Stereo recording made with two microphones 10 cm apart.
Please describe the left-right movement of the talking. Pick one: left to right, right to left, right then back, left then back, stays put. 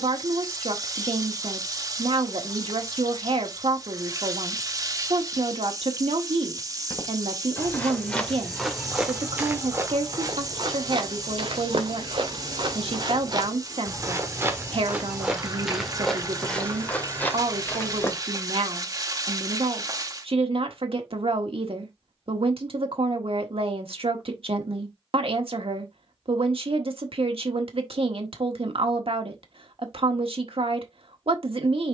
stays put.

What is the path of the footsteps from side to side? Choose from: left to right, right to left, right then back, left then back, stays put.
right then back.